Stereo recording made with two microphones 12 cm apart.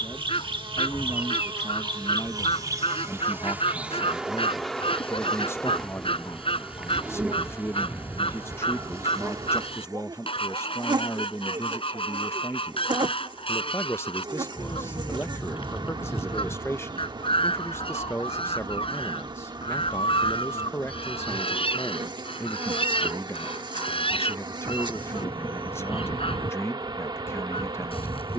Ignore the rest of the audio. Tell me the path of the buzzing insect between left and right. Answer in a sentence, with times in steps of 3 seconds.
In this clip you hear the buzzing insect on the right from 0 s, in the centre from 3 s and on the right from 9 s.